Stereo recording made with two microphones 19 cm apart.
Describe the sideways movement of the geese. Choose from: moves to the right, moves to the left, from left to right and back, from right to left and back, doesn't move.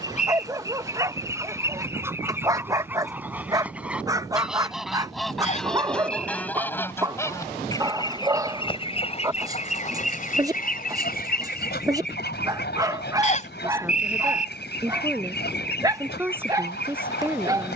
moves to the left.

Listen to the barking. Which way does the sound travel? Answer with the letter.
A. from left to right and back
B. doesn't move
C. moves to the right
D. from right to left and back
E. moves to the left
B.